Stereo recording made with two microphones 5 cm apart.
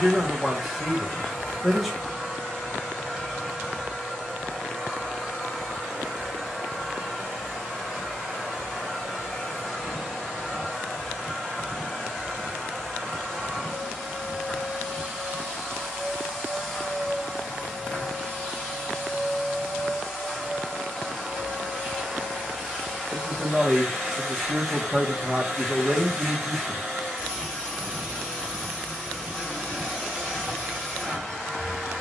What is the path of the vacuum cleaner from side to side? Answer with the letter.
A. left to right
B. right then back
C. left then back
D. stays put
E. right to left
D.